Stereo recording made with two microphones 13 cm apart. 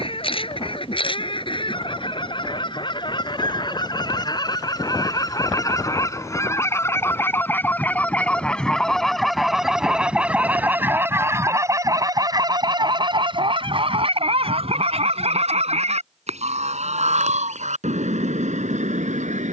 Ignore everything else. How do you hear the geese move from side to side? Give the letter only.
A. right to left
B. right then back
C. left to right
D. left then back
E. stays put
C.